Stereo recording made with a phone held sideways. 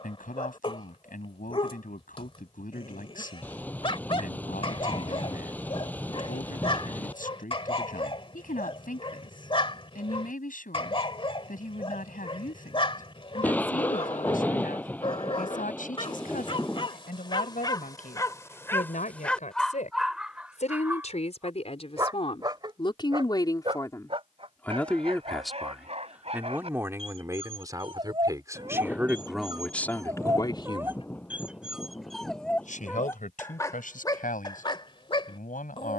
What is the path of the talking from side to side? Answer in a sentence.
You can hear the talking go right and come back.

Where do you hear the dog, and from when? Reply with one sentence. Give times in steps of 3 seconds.
You can hear the dog on the left from 0 s, in the centre from 18 s, on the right from 21 s, in the centre from 30 s and on the left from 33 s.